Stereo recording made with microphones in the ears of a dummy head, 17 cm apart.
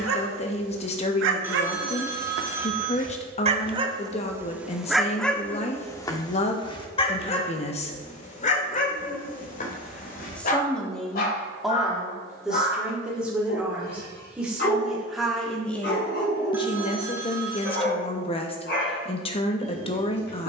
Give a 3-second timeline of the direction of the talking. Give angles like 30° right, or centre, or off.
30° left, 30° left, 30° left, centre, 10° right, 20° left, 30° left.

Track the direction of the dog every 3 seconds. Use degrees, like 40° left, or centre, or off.
60° right, 10° right, 30° left, 50° left, 50° left, 60° left, 60° left.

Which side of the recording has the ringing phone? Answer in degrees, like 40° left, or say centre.
10° right.